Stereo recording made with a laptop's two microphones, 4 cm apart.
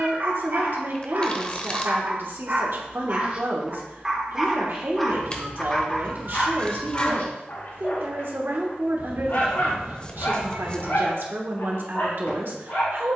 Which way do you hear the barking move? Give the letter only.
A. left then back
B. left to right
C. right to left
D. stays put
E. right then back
C.